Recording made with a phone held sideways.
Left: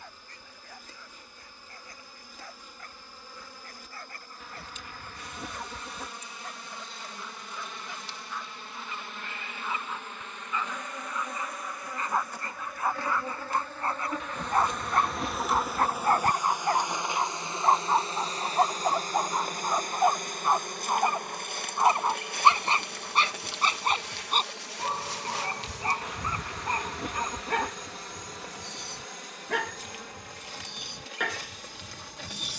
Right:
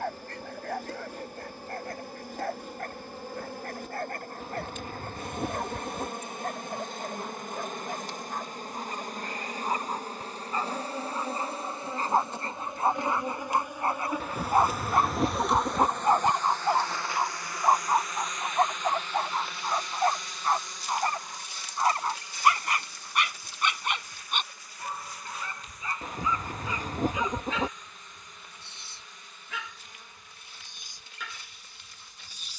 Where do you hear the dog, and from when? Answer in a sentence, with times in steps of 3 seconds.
In this clip you hear the dog on the right from 0 s, in the centre from 15 s and on the left from 21 s.